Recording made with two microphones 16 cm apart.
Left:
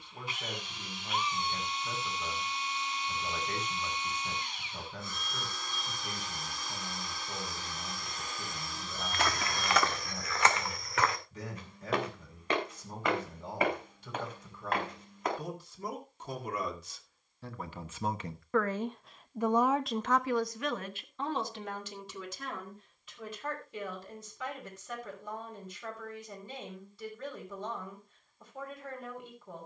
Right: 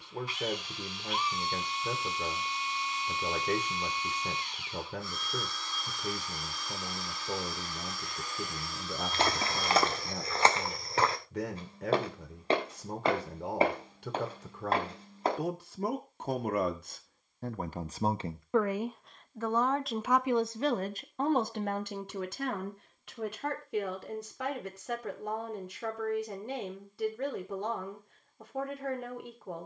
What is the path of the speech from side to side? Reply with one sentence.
In this clip you hear the speech go left and come back.